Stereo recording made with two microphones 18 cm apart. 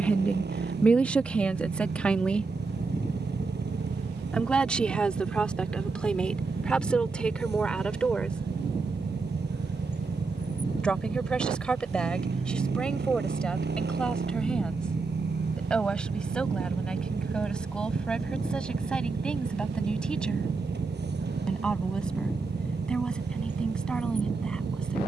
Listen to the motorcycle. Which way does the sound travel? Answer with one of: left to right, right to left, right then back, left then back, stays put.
stays put.